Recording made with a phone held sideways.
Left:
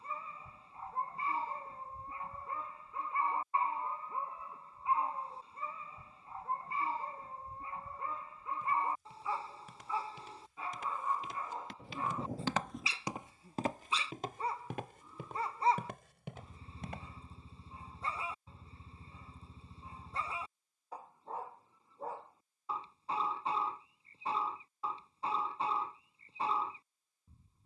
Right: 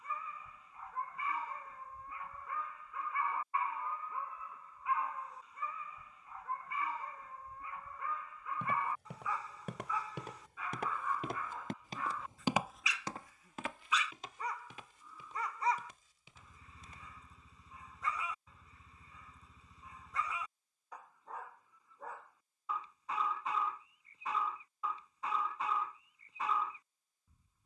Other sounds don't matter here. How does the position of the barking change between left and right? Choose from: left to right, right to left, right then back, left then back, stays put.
stays put.